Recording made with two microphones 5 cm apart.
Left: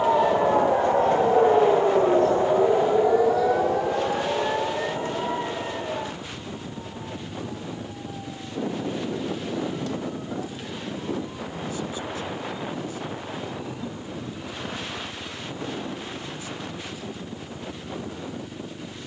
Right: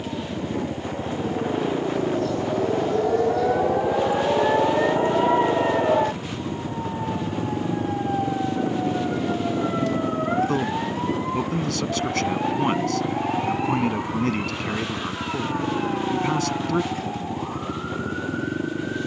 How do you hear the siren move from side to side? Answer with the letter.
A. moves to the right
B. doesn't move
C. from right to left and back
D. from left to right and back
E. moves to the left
A.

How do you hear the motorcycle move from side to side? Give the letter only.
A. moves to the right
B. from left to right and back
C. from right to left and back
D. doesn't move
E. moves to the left
D.